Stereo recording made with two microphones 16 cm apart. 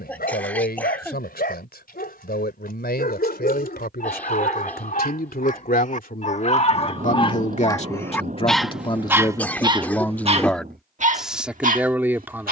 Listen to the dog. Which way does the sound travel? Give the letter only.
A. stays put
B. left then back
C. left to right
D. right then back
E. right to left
C.